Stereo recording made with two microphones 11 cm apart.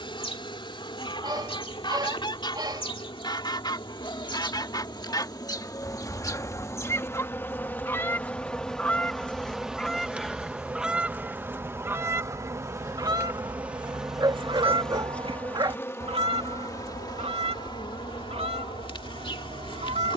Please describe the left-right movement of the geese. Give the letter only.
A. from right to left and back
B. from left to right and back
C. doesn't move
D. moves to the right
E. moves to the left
D.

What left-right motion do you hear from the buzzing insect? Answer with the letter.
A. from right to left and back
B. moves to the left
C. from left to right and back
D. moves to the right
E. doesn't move
C.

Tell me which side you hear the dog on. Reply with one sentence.
You can hear the dog on the right.